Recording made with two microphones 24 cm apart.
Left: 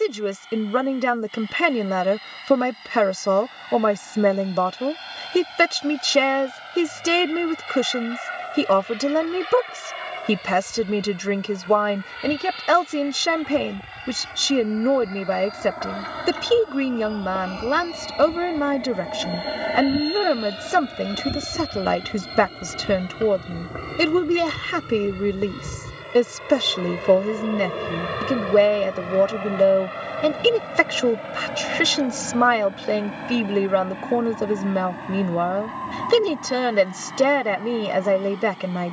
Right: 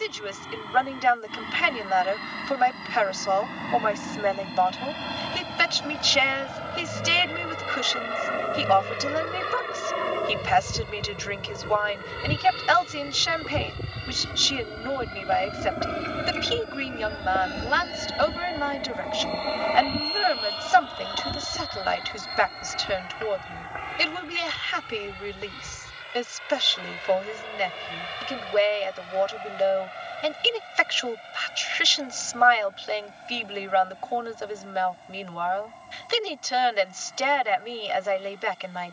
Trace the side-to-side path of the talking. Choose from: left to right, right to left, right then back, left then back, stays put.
stays put.